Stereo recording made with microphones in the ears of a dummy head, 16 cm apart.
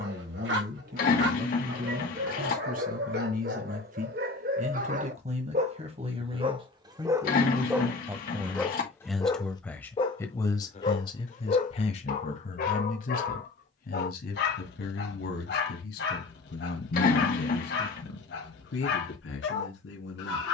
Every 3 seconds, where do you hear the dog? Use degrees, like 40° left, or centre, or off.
60° right, 50° right, 10° right, 30° left, 60° left, 60° left, 60° left.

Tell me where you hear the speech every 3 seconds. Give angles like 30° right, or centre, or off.
50° right, 40° right, 20° right, 20° left, 50° left, 60° left, 70° left.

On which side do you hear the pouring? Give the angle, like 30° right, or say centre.
50° left.